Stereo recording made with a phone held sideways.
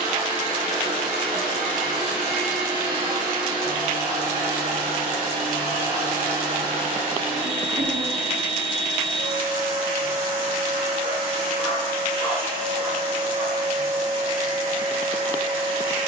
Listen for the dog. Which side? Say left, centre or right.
centre.